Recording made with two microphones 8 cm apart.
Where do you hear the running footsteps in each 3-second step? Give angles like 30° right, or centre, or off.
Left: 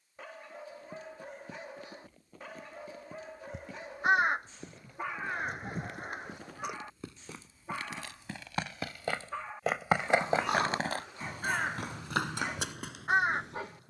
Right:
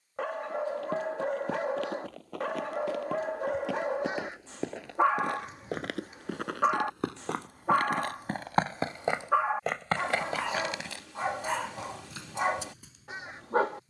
80° right, 80° right, 50° right, 30° left, 70° left.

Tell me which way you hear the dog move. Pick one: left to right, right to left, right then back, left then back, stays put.
stays put.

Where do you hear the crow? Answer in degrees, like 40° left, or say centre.
60° left.